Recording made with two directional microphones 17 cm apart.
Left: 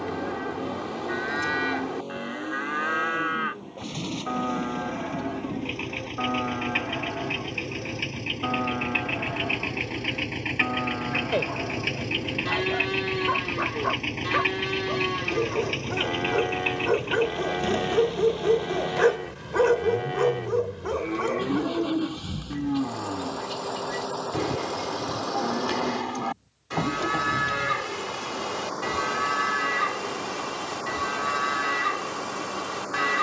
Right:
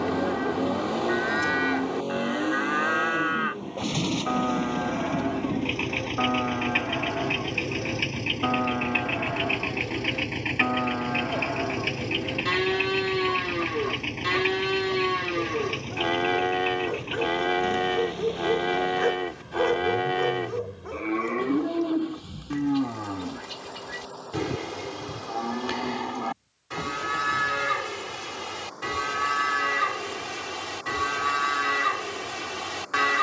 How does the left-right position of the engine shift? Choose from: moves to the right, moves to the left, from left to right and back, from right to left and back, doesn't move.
moves to the left.